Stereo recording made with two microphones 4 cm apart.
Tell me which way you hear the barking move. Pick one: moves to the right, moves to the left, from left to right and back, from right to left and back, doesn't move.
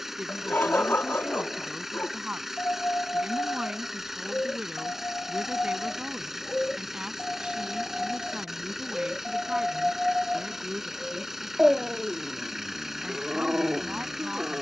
moves to the right.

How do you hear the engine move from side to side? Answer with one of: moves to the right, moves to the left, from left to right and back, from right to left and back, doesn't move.
doesn't move.